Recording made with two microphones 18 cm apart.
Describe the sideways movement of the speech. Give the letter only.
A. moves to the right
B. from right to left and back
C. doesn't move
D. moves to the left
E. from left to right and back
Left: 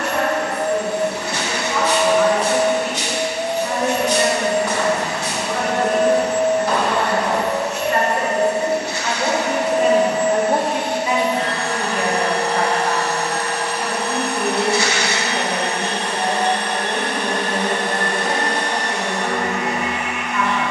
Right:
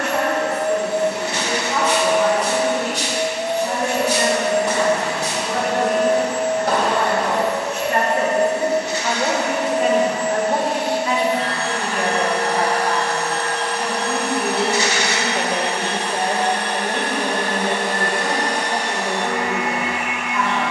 B.